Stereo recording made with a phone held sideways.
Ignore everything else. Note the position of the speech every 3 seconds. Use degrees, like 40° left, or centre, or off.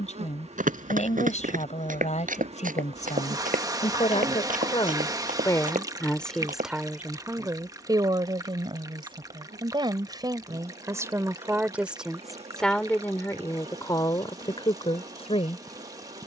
60° left, 40° left, 20° right, 30° right, 20° left, 50° left.